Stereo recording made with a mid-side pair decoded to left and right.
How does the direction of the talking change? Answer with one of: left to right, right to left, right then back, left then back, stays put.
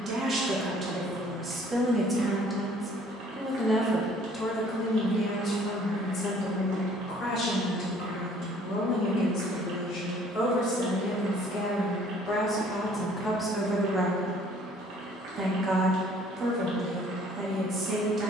left then back.